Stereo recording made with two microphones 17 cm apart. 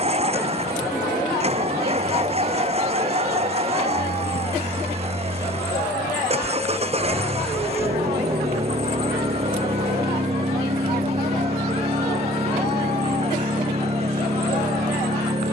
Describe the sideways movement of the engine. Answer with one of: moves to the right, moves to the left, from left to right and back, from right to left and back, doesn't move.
doesn't move.